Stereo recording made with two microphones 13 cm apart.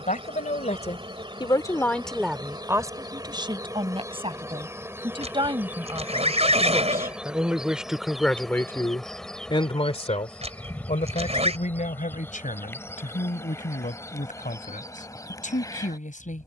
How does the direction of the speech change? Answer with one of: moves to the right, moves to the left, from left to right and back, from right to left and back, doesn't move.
from left to right and back.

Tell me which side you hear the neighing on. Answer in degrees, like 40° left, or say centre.
50° right.